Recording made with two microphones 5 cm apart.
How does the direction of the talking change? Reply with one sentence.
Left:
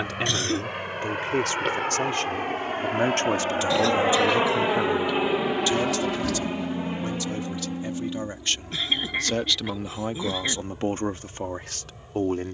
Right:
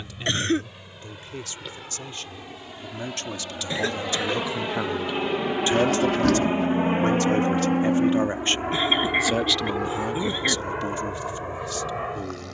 In this clip you hear the talking go right and come back.